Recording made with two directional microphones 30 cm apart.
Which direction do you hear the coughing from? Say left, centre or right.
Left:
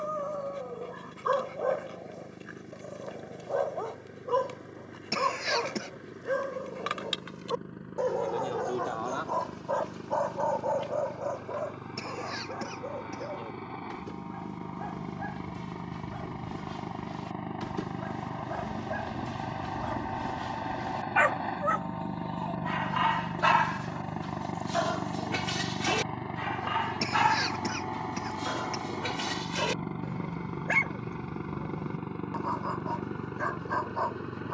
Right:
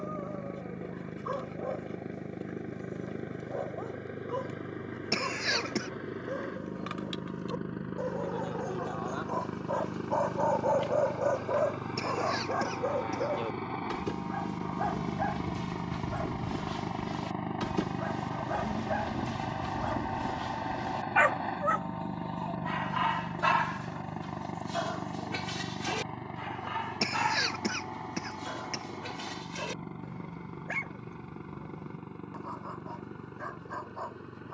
centre.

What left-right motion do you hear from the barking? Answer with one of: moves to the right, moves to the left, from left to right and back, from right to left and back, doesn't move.
from left to right and back.